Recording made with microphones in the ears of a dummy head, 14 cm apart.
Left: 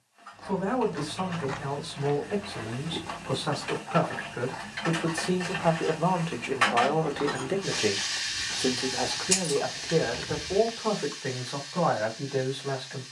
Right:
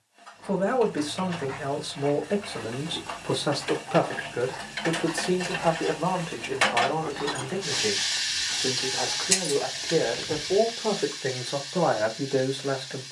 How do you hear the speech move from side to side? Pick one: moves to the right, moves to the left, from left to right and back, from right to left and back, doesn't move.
from right to left and back.